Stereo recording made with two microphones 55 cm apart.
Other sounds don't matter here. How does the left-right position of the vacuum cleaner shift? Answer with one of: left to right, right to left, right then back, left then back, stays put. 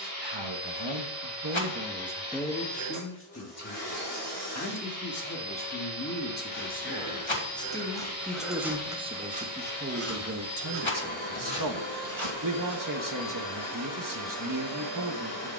stays put.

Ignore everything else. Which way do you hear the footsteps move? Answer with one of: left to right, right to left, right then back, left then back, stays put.
left to right.